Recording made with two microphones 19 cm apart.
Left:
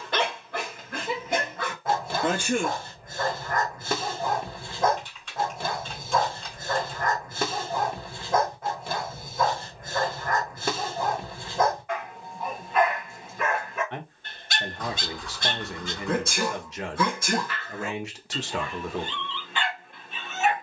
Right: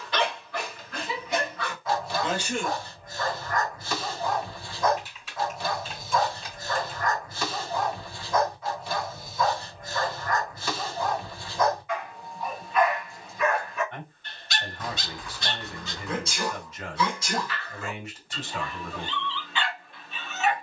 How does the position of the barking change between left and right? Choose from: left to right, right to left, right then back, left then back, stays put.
stays put.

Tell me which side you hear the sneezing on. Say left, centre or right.
left.